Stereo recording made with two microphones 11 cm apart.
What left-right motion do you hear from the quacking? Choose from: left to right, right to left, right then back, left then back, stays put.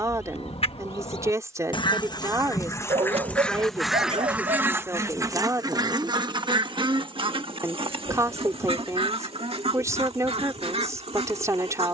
left to right.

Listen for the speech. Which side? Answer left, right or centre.
right.